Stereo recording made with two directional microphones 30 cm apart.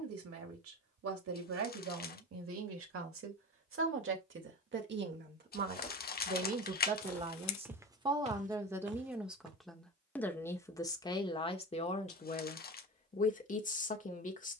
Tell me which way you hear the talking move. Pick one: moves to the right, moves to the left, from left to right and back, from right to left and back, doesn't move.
moves to the left.